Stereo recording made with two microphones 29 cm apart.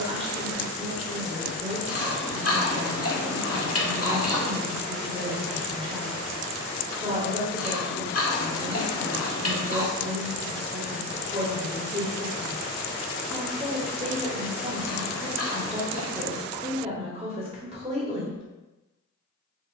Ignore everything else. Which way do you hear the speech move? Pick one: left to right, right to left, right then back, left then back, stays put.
stays put.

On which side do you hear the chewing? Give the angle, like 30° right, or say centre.
50° left.